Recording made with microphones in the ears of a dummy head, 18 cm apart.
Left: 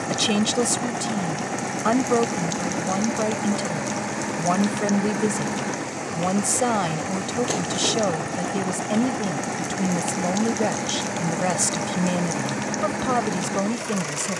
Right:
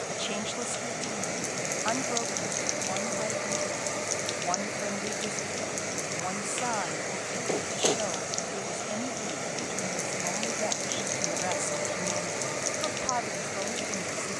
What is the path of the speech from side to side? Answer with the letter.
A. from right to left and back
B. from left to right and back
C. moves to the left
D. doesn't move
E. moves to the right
D.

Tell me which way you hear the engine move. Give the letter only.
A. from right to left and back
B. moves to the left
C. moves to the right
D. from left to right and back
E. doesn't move
E.